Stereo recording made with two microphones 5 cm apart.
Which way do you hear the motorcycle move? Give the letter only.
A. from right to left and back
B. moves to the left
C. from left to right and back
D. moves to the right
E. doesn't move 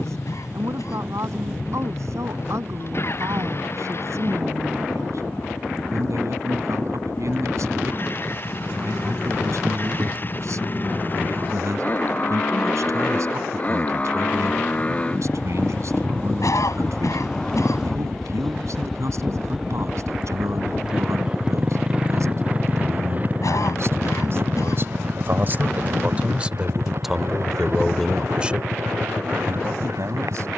D.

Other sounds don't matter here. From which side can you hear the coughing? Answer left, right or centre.
left.